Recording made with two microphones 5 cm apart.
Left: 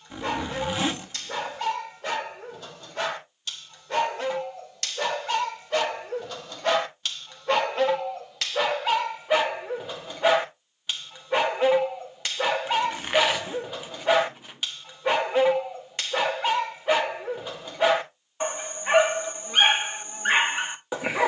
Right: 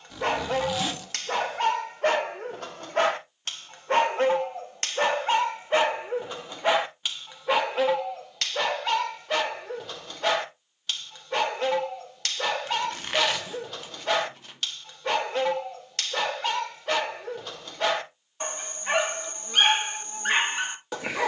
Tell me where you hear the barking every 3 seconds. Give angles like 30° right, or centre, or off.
60° right, 40° right, 10° right, 10° left, 10° left, 10° left, 10° left.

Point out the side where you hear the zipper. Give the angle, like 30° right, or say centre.
20° left.